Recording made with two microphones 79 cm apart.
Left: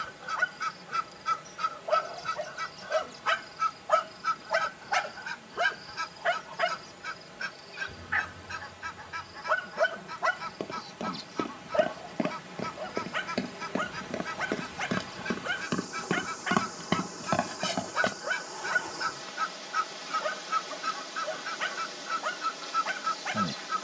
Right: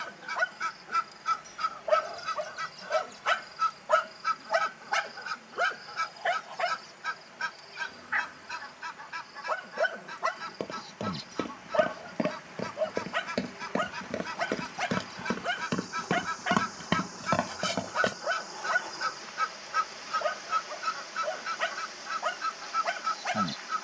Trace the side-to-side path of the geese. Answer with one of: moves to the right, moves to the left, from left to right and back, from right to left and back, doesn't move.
from left to right and back.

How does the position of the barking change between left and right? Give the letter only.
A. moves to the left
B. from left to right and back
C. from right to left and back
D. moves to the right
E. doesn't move
C.